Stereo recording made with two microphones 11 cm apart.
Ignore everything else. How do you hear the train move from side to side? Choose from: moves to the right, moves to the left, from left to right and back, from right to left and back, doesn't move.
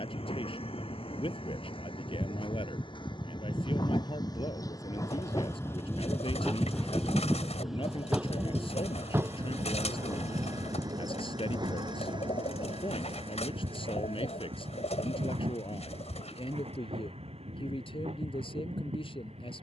moves to the right.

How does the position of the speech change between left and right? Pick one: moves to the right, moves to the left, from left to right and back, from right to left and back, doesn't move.
doesn't move.